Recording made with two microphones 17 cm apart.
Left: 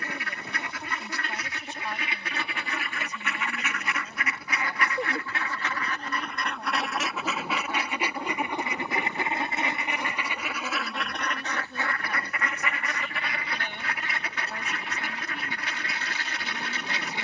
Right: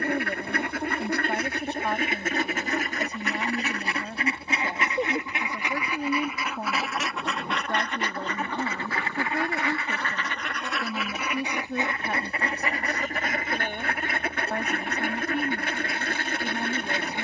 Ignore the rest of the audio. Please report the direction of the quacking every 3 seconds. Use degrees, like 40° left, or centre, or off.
50° right, 30° right, centre, centre, 40° right, 50° right.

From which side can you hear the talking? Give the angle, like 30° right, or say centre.
60° right.